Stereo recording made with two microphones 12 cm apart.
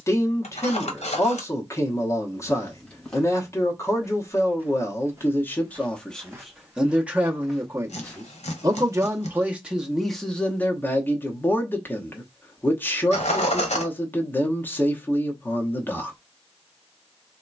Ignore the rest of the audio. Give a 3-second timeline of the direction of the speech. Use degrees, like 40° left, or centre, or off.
30° left, 20° left, 20° right, 10° left, 20° left, 20° left.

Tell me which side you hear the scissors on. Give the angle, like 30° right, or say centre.
80° left.